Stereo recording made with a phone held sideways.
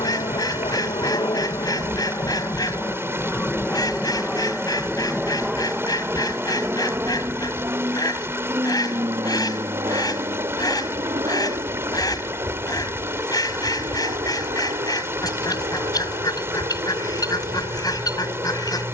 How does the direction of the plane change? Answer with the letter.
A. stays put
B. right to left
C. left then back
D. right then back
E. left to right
E.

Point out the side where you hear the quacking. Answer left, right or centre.
left.